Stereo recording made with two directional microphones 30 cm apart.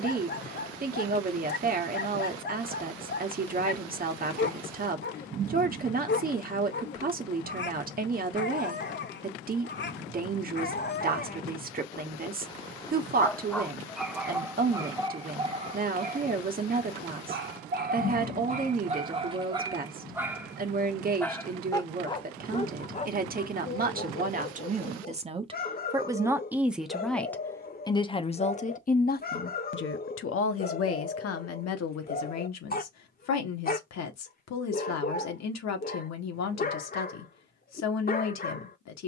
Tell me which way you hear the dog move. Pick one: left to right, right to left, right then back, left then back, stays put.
right then back.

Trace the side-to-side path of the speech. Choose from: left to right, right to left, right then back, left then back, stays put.
right to left.